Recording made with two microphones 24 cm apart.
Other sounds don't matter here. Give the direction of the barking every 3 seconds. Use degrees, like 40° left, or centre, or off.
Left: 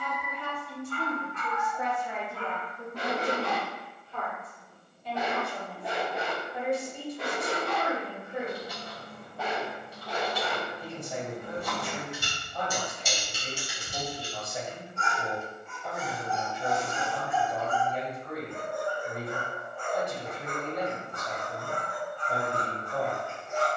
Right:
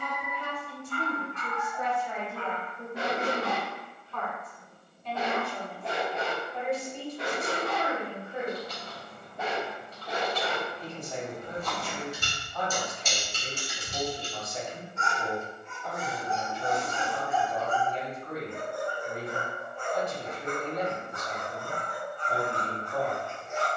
20° right, 10° left, centre, 20° right, 30° right, 30° right, 30° right, 30° right.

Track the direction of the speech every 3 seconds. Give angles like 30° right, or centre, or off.
10° right, 10° left, 10° left, 10° left, 10° left, 10° left, 10° left, 10° left.